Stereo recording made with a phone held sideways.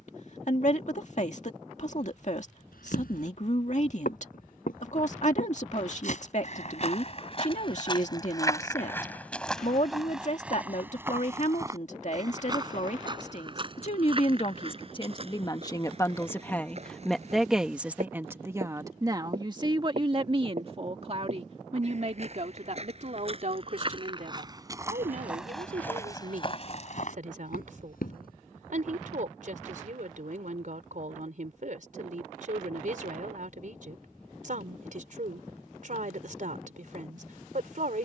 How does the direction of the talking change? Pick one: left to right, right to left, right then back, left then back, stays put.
left to right.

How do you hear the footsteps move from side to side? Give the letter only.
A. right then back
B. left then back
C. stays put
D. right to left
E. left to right
A.